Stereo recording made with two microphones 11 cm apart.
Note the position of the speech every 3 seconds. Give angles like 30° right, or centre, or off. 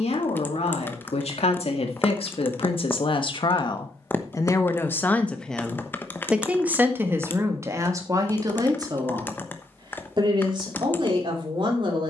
70° left, 30° left, 30° right, 50° right.